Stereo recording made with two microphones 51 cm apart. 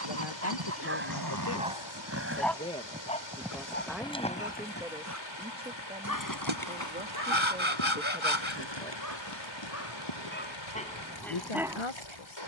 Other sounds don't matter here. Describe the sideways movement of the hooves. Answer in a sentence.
You can hear the hooves move to the left.